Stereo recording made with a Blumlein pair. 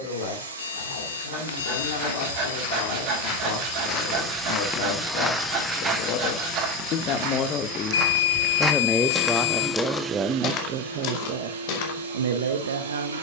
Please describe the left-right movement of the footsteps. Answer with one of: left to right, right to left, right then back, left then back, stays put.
right then back.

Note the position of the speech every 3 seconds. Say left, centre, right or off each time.
left, left, left, right, right.